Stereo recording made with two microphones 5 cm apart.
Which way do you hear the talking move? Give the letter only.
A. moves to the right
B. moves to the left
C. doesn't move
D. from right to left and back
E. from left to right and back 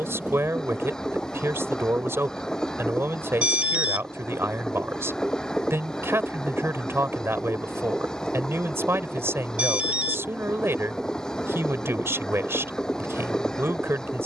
C.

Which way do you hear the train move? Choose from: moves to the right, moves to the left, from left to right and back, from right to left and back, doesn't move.
doesn't move.